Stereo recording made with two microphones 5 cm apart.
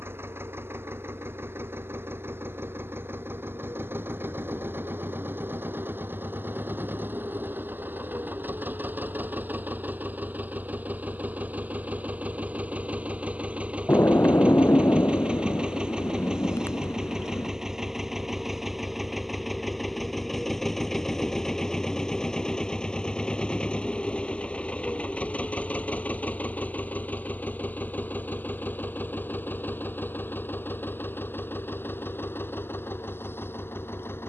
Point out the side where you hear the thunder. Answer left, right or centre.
left.